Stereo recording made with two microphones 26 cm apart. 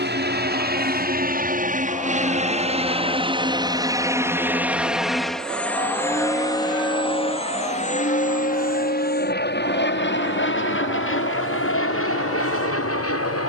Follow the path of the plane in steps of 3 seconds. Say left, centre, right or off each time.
right, centre, left, left, left.